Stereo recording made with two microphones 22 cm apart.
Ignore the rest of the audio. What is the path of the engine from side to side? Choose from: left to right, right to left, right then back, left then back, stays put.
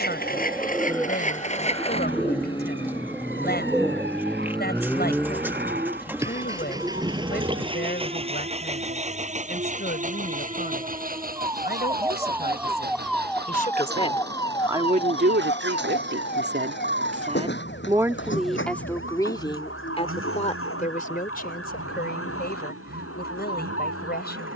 left to right.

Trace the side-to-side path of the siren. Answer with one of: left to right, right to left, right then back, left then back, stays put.
right to left.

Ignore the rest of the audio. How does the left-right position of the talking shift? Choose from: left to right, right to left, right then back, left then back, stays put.
right then back.